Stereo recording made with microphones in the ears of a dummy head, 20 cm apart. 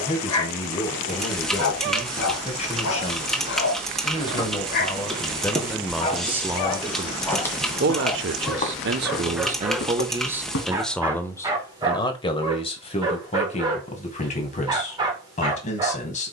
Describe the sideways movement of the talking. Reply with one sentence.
You can hear the talking go right and come back.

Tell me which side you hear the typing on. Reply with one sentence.
You can hear the typing in the centre.